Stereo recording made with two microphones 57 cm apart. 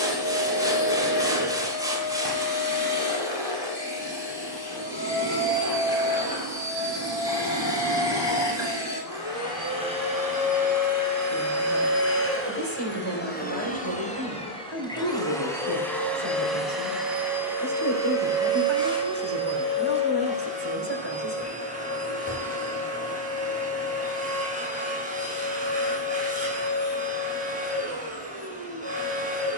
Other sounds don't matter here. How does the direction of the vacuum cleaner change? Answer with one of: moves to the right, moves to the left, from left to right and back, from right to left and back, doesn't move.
moves to the right.